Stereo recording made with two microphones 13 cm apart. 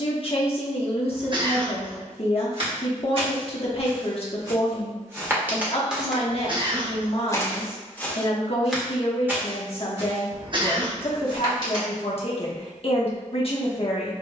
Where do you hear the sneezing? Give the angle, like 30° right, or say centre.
40° right.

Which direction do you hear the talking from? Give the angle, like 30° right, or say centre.
40° left.